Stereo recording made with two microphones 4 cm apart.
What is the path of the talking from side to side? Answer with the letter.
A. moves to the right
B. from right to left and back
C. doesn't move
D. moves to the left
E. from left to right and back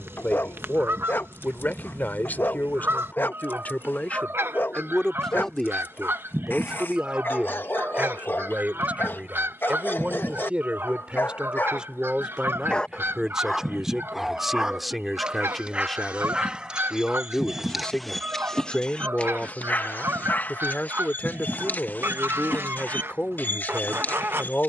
E.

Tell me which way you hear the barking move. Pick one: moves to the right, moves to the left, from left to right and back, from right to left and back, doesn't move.
from left to right and back.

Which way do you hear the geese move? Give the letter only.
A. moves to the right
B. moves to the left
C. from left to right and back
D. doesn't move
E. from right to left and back
D.